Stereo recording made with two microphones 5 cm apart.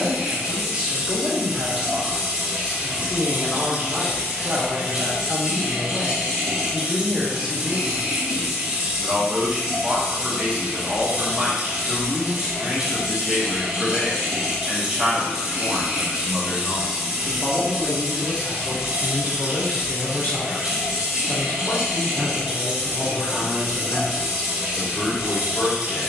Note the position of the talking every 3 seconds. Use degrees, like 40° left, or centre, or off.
20° right, 20° right, 20° right, 20° right, 20° right, 10° left, 40° left, 50° left, 50° left.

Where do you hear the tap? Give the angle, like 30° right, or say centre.
20° right.